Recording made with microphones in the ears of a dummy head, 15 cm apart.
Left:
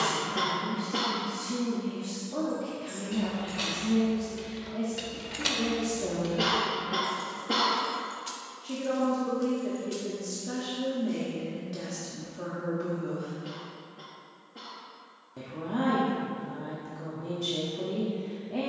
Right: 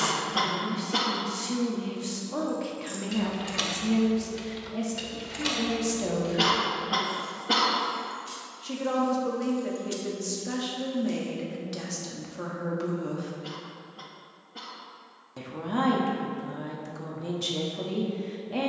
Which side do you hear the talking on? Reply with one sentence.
In this clip you hear the talking on the right.